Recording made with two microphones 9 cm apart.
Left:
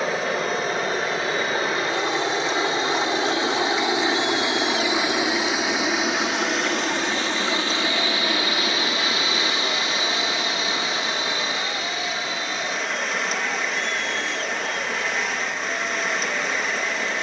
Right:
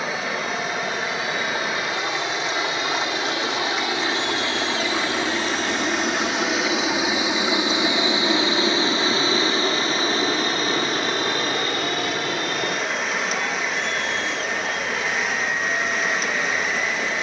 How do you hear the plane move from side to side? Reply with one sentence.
You can hear the plane travel towards the right.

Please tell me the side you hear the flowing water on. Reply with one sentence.
You can hear the flowing water in the centre.